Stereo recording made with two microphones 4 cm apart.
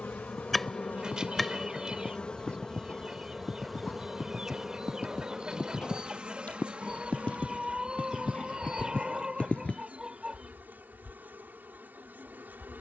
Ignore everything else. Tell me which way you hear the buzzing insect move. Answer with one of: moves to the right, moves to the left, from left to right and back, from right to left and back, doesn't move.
moves to the right.